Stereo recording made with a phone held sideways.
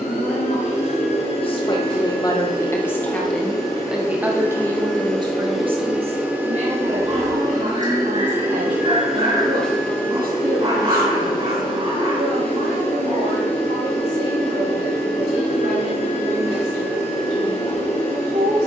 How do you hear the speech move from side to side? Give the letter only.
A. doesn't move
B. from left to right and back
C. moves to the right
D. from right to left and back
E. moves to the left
C.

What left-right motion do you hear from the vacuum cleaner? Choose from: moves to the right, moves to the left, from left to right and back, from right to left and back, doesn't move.
from left to right and back.